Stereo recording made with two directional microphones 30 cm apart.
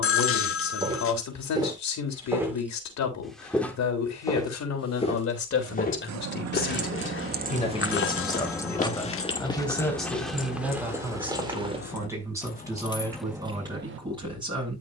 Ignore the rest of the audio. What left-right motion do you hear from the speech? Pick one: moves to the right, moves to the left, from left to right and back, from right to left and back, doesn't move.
moves to the right.